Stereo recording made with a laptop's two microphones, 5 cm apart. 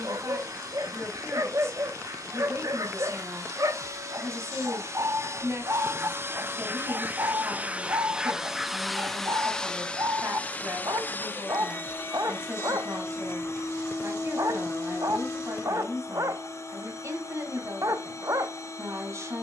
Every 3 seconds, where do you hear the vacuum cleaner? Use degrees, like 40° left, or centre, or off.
70° right, 60° right, 30° right, 20° left, 50° left, 60° left, 60° left.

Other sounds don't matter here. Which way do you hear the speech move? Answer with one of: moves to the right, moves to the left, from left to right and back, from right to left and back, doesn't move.
doesn't move.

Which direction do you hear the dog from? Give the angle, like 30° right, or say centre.
70° right.